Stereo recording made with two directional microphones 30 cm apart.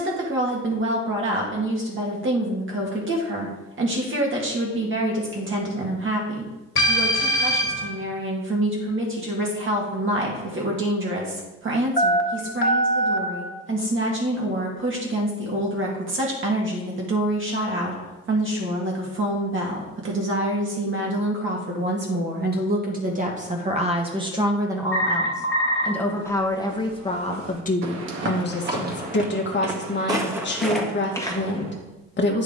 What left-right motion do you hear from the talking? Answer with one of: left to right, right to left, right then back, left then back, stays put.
right to left.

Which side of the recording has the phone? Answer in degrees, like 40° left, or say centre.
40° left.